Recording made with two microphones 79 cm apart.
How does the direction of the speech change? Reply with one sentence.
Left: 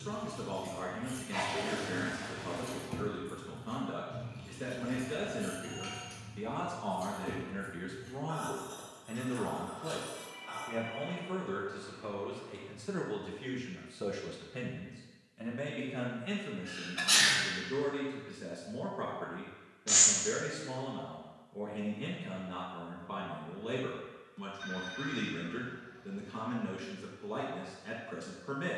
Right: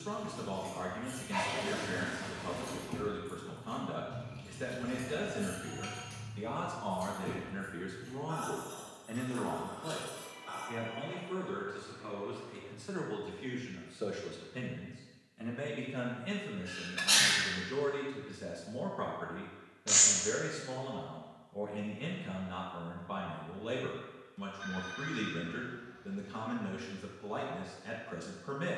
You can hear the speech move from right to left and back again.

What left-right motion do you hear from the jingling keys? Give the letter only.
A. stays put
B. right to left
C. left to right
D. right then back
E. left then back
C.